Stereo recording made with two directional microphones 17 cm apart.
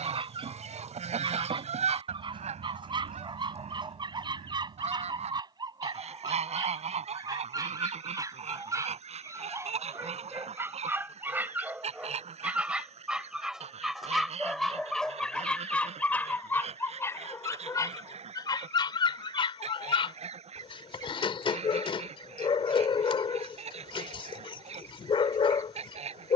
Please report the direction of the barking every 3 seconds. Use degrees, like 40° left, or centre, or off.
30° right, 30° right, 20° right, 10° right, centre, 10° left, 30° left, 30° left, 30° left.